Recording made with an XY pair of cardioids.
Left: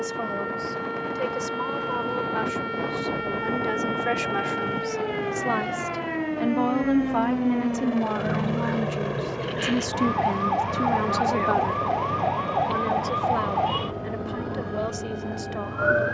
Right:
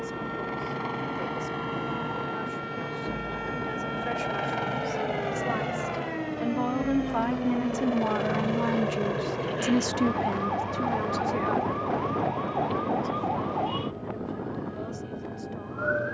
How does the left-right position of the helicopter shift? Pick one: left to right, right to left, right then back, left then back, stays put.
right to left.